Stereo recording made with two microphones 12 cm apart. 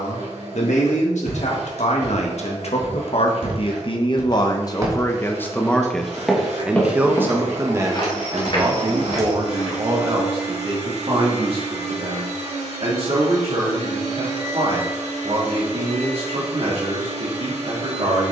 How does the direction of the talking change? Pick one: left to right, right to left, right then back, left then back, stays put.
left to right.